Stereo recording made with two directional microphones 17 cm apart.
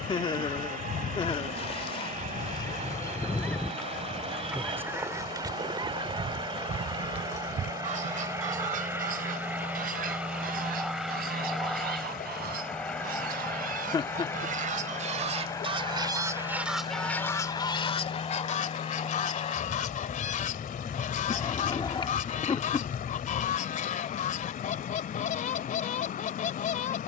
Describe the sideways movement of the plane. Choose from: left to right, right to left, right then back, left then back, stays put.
right to left.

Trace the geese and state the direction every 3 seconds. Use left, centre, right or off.
left, centre, right, right, right, centre, left, left, left.